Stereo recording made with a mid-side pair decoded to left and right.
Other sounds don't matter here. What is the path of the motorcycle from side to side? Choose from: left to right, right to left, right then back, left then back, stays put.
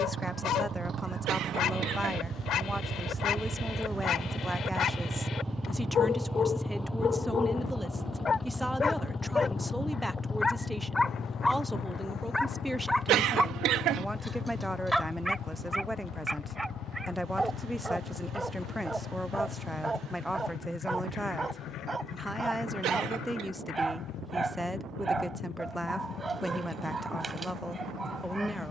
right to left.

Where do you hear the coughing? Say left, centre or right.
right.